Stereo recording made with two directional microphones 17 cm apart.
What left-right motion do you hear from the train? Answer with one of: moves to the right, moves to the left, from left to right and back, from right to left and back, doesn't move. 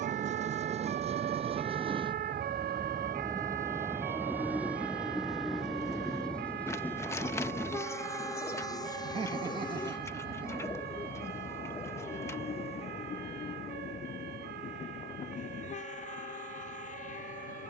moves to the left.